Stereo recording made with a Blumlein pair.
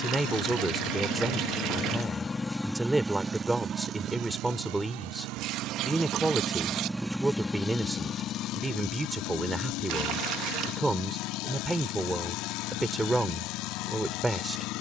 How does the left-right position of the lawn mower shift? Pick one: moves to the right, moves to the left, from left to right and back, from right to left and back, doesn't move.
from left to right and back.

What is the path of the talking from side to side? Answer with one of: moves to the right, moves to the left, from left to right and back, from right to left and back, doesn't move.
doesn't move.